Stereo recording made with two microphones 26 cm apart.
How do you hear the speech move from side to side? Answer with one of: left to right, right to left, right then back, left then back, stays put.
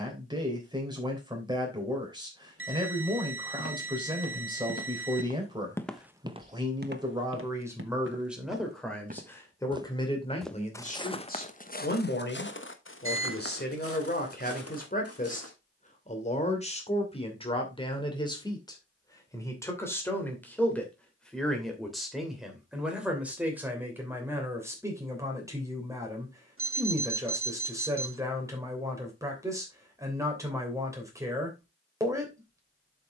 left then back.